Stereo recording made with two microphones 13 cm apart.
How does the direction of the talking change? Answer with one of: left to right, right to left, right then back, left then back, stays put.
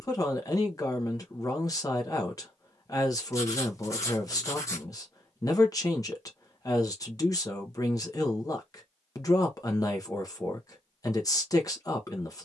stays put.